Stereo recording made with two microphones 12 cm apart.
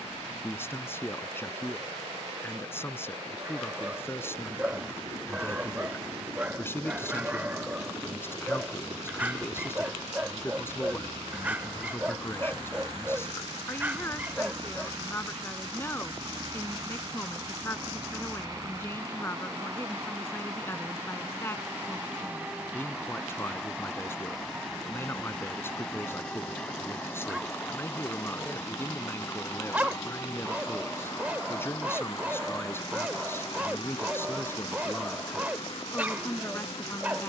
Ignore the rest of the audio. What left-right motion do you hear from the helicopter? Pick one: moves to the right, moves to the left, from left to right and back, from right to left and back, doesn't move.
moves to the left.